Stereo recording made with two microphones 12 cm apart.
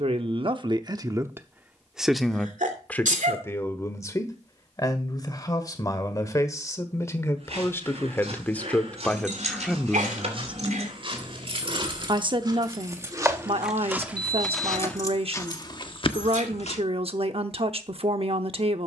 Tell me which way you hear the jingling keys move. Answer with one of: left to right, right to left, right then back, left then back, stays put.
right to left.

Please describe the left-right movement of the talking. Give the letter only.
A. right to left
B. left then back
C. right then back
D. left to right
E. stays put
B.